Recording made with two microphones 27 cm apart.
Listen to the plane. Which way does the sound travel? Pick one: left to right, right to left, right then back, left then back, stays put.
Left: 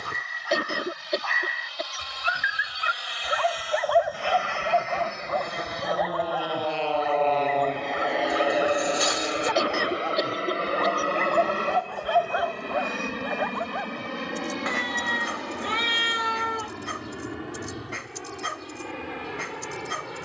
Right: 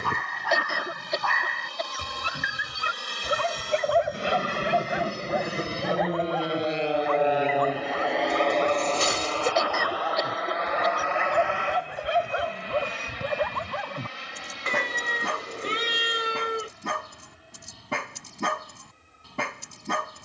right to left.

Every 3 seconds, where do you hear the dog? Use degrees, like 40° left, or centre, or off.
60° right, 20° right, 10° left, centre, 50° right, 70° right, 70° right.